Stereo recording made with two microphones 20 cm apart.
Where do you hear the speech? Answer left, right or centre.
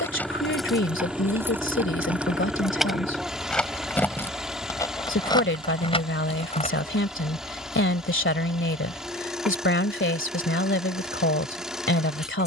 left.